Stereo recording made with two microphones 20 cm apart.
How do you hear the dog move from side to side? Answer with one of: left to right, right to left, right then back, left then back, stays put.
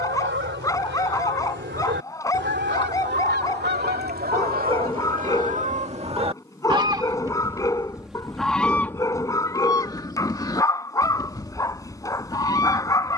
stays put.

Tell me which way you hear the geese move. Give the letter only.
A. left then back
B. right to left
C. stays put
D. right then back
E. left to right
B.